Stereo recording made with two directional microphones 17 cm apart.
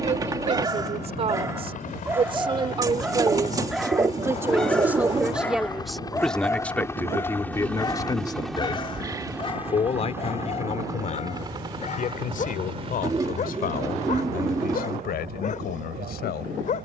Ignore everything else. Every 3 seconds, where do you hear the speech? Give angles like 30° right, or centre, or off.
30° right, 10° right, 20° left, 40° left, 60° left, 60° left.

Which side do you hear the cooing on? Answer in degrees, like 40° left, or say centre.
20° right.